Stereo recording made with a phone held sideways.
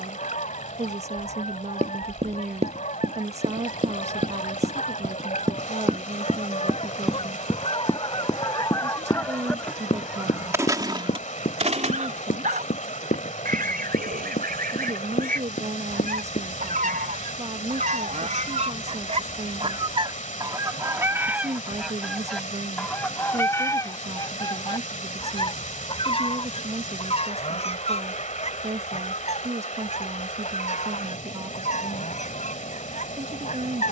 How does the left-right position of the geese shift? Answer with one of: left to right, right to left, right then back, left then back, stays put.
right then back.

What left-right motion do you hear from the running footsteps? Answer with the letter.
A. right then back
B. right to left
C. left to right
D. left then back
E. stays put
B.